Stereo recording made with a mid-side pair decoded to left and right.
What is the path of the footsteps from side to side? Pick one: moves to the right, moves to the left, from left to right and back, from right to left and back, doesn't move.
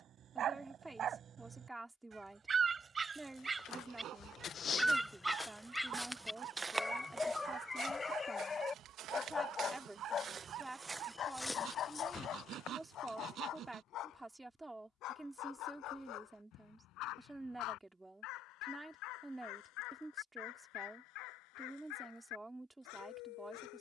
from left to right and back.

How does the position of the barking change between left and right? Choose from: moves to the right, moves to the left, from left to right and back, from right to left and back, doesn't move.
moves to the left.